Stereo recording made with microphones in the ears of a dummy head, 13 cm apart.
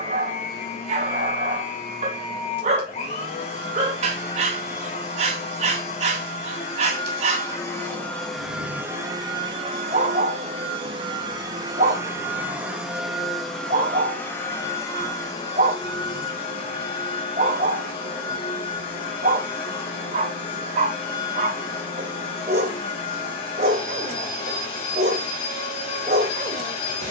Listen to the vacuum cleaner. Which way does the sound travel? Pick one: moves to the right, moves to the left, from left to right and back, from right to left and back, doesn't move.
from left to right and back.